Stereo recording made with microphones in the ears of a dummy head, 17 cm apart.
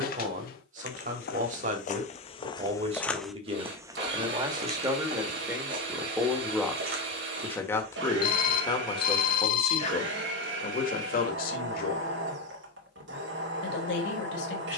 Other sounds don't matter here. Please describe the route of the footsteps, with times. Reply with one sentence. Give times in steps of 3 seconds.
In this clip you hear the footsteps on the left from 0 s, on the right from 3 s and not at all from 9 s.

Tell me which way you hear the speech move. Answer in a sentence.
In this clip you hear the speech travel towards the left.